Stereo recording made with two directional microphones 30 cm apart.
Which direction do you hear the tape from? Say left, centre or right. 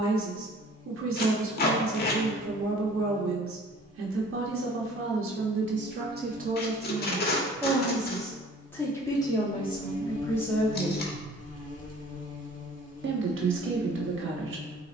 left.